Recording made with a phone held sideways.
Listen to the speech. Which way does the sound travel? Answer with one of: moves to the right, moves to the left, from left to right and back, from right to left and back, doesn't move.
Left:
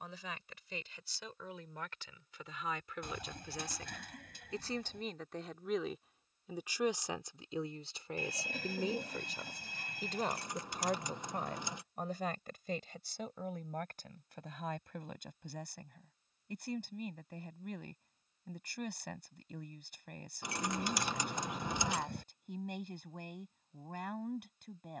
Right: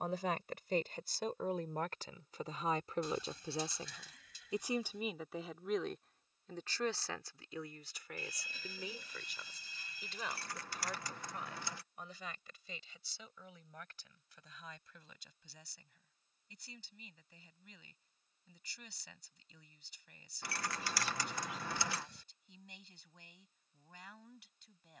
moves to the left.